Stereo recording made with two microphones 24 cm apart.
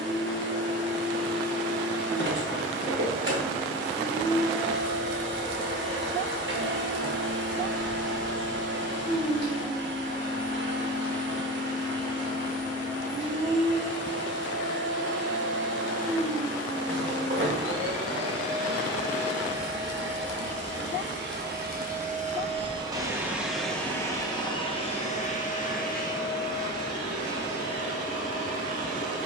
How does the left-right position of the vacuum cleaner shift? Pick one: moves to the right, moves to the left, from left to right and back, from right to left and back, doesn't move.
moves to the left.